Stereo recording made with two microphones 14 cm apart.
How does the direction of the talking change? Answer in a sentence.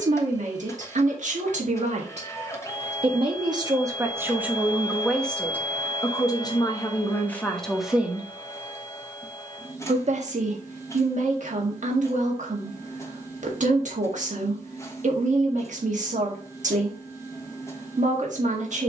You can hear the talking go left and come back.